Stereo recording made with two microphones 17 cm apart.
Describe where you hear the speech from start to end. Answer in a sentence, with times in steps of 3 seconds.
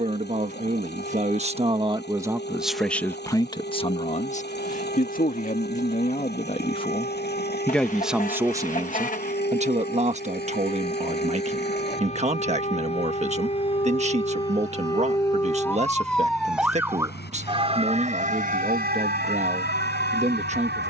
In this clip you hear the speech on the right from 0 s, on the left from 3 s, in the centre from 6 s and on the right from 9 s.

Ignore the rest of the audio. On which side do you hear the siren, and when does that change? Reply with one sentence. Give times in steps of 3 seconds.
In this clip you hear the siren on the left from 0 s, in the centre from 15 s and on the right from 18 s.